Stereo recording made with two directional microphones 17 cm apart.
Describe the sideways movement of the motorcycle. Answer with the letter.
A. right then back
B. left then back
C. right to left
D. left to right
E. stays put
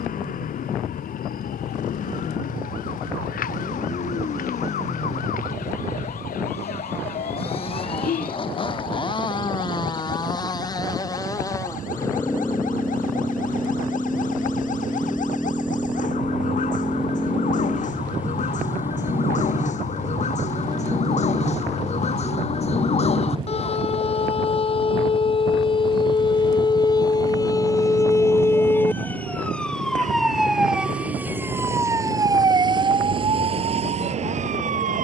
D.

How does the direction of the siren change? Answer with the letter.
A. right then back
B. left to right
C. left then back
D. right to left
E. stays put
B.